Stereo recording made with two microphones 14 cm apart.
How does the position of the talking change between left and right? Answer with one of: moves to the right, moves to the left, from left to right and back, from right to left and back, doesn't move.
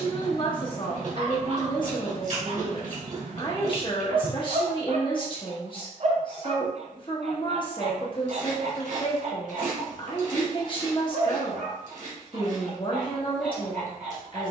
doesn't move.